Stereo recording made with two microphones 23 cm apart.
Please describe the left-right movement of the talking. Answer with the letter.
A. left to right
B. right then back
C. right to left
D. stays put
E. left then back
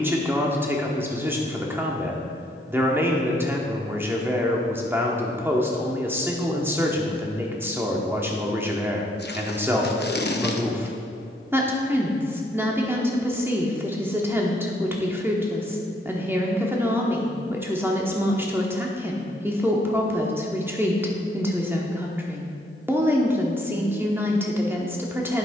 D.